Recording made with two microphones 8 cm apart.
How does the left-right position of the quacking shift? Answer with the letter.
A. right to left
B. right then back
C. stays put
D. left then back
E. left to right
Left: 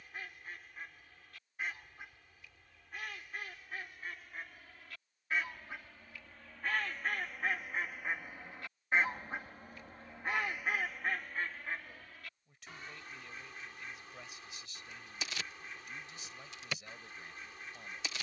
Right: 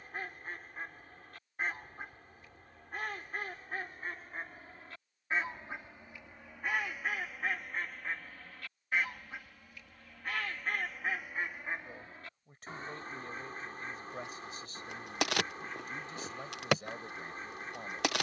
D.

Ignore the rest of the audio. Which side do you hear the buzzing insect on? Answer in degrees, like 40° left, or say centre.
70° right.